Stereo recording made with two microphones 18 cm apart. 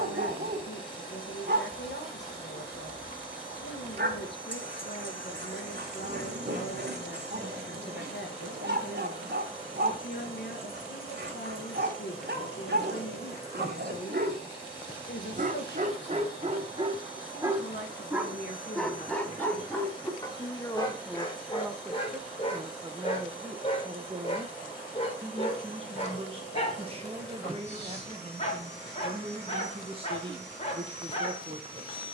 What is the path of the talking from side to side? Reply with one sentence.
You can hear the talking move from left to right.